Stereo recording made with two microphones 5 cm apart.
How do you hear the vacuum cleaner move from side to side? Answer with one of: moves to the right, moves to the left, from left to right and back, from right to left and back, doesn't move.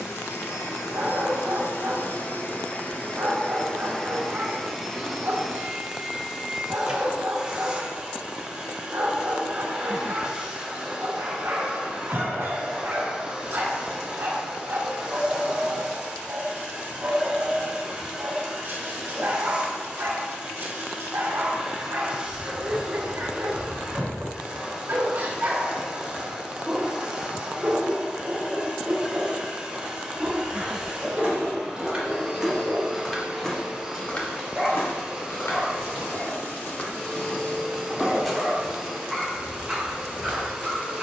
moves to the right.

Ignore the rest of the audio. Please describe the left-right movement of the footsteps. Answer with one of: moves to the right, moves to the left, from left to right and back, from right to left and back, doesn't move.
from right to left and back.